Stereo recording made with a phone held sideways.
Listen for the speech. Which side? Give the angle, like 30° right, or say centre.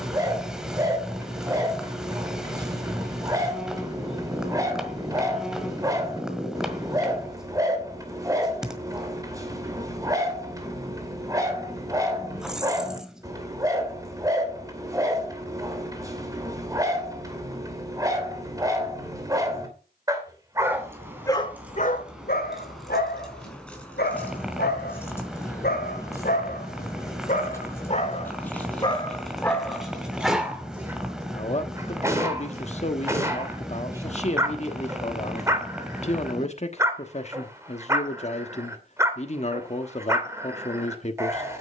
40° left.